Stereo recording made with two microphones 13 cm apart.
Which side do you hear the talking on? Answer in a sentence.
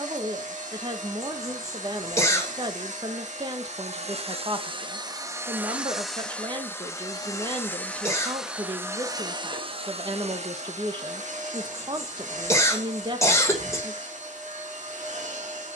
In this clip you hear the talking on the right.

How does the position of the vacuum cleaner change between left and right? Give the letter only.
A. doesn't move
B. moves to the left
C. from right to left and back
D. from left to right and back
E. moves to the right
C.